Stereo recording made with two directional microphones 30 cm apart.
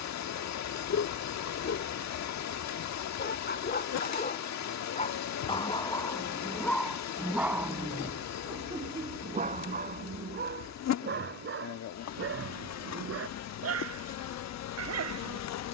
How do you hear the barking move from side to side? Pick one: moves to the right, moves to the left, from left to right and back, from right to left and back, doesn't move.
moves to the right.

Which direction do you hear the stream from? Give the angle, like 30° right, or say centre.
60° left.